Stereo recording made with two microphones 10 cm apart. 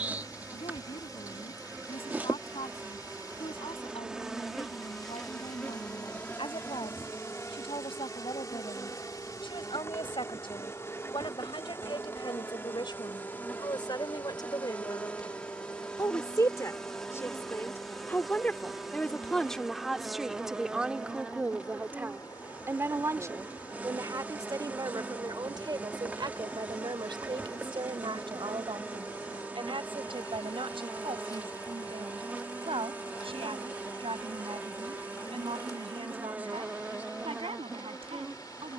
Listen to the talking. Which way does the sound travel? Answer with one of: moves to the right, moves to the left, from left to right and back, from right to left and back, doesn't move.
moves to the right.